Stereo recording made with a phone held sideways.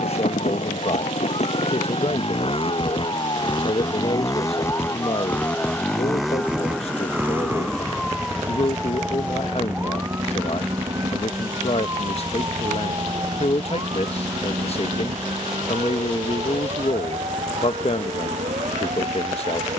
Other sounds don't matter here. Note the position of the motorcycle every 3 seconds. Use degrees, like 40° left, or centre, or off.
50° left, 20° left, 10° right, 40° right, 50° right, 60° right, 60° right.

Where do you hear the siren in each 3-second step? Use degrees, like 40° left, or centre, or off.
40° left, 30° left, 10° left, 20° right, 30° right, 40° right, 50° right.